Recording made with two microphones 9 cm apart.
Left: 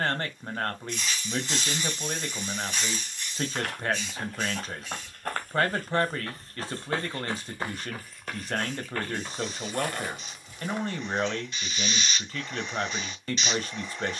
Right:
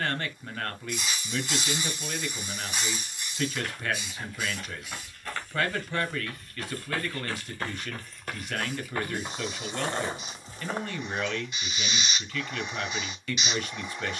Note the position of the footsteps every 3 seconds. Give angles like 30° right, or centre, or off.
off, 50° left, 10° left, 30° right, off.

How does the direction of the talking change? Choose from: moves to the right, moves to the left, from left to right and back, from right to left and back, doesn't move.
doesn't move.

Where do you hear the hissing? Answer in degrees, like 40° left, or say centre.
10° right.